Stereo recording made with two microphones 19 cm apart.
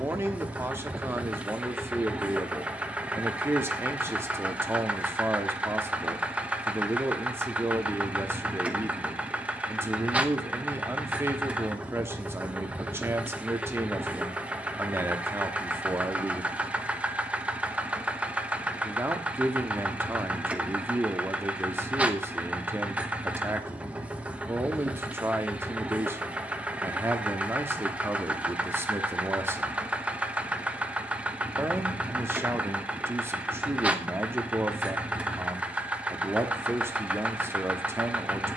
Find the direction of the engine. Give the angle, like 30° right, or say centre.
10° right.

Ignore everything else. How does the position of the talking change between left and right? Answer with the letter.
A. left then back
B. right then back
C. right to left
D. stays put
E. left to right
D.